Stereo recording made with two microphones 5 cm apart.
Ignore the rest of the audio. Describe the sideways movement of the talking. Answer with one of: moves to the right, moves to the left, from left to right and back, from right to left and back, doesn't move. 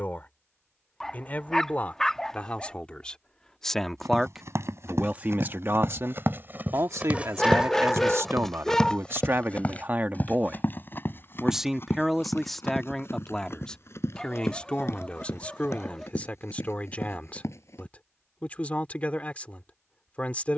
from left to right and back.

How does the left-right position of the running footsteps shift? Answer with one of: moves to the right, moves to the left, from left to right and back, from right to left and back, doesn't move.
moves to the left.